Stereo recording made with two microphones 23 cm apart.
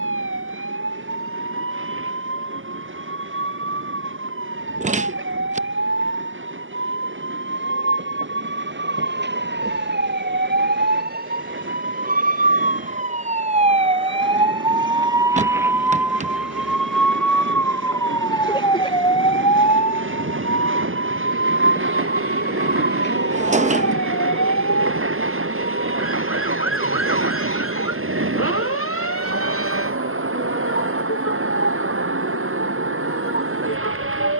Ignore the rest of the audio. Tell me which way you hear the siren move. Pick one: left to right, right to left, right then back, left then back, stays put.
right to left.